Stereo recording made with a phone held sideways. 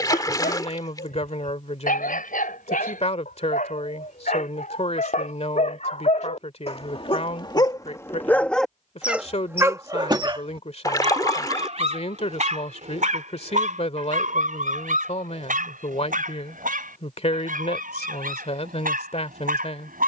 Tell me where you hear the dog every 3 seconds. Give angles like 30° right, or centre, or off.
80° left, 60° left, 30° left, 30° right, 60° right, 70° right, 70° right.